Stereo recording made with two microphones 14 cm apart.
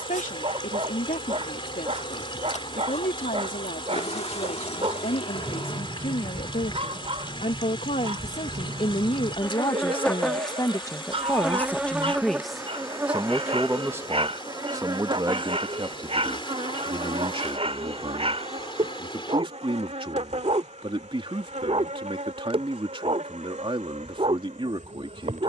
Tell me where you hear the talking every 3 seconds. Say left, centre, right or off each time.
left, left, left, left, centre, right, right, right, right.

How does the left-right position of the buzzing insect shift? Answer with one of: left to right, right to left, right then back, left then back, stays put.
left to right.